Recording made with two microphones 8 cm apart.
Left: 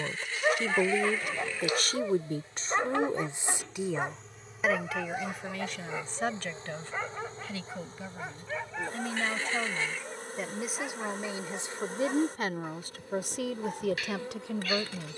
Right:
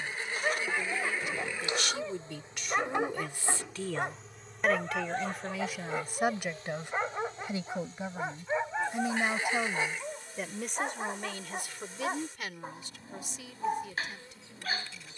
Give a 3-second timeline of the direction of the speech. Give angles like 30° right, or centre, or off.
50° left, 10° left, 20° right, 10° left, 60° left.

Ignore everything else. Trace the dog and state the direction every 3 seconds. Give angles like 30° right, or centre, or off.
20° left, centre, 20° right, 30° right, 30° right.